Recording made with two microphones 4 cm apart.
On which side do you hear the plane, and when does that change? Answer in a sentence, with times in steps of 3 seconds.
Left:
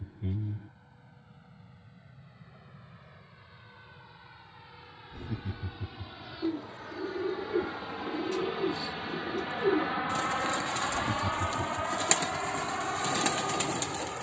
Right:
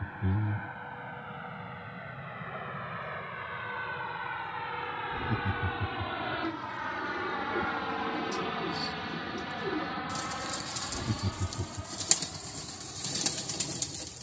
You can hear the plane on the right from 0 s and on the left from 9 s.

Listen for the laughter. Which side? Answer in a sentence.
In this clip you hear the laughter in the centre.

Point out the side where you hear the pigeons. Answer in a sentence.
In this clip you hear the pigeons on the left.